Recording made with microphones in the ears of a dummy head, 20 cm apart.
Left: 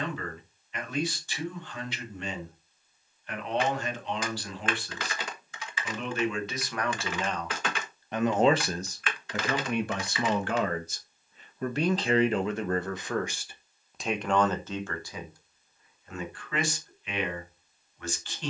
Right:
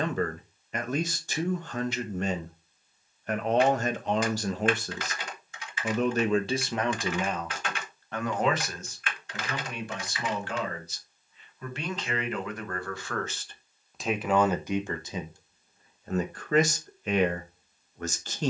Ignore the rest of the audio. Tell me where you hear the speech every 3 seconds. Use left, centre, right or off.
right, right, centre, left, centre, right.